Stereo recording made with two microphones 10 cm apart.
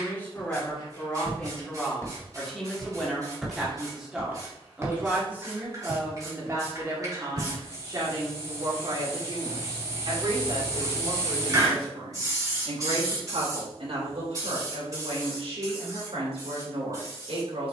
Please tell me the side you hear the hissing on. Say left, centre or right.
right.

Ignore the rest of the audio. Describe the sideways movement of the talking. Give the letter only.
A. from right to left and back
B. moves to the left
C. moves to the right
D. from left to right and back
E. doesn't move
C.